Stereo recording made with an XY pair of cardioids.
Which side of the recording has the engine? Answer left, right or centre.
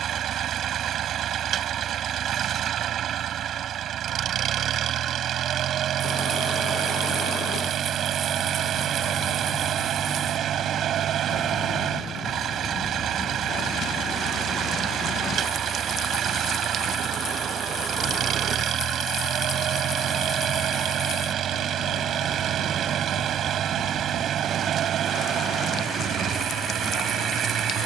right.